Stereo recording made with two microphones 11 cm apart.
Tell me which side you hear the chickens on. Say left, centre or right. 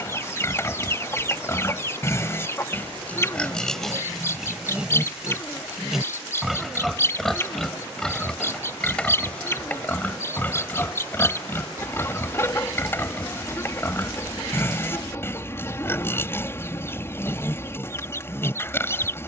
left.